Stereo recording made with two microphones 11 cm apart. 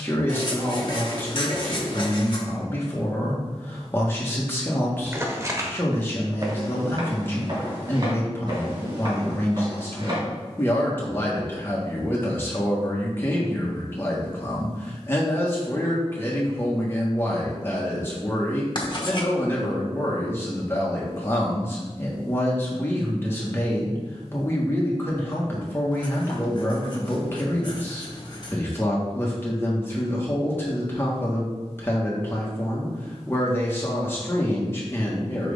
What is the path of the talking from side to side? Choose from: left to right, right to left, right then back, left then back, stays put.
stays put.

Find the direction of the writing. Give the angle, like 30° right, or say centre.
40° left.